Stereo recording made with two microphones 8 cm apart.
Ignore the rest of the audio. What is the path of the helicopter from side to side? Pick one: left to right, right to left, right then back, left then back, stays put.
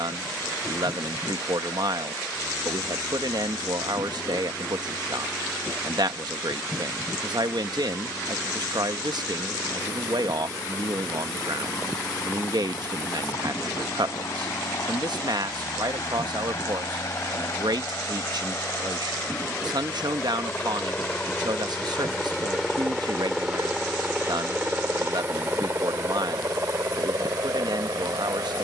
left to right.